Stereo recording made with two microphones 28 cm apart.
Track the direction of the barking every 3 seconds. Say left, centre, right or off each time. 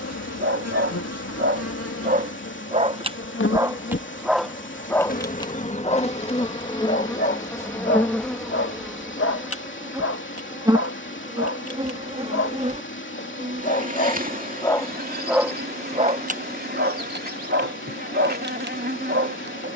right, centre, left, left, left, right, right.